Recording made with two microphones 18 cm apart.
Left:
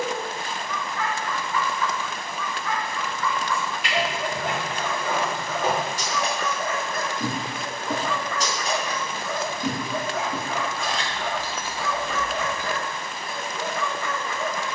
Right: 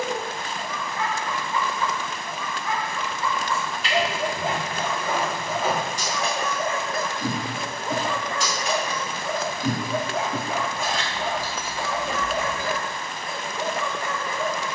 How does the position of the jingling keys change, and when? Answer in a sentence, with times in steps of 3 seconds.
You can hear the jingling keys not at all from 0 s, on the left from 3 s, in the centre from 9 s and on the right from 12 s.